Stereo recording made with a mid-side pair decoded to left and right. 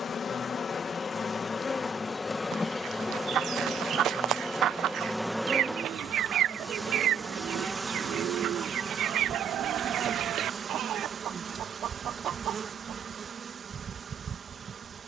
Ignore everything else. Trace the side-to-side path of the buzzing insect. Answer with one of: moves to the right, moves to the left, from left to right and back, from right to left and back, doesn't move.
moves to the right.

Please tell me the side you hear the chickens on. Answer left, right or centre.
right.